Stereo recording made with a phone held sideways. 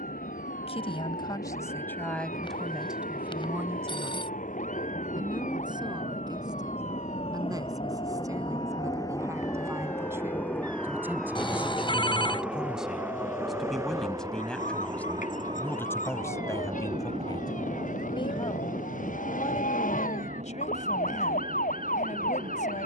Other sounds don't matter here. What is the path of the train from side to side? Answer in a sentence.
You can hear the train go from the left side to the right.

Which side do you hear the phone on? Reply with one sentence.
You can hear the phone on the left.